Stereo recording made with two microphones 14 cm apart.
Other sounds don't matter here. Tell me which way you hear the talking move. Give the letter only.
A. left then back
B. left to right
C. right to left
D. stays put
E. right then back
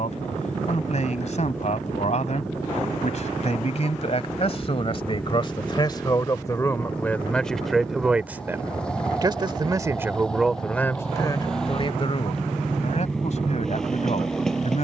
E.